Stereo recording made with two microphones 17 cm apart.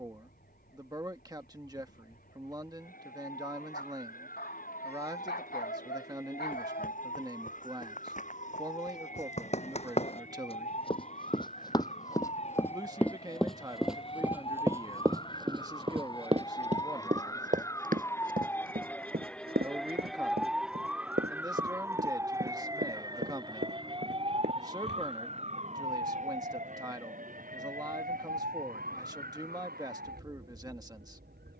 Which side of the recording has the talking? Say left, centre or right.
right.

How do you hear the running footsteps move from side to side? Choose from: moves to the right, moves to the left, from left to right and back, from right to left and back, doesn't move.
moves to the right.